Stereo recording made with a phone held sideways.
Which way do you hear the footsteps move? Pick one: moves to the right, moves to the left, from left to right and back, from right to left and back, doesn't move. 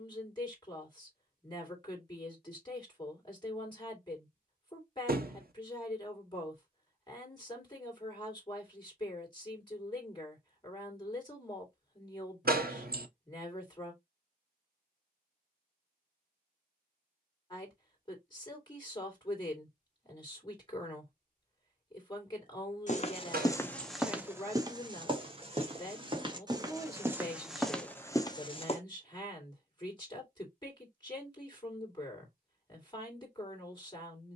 from left to right and back.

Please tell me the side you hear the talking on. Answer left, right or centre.
left.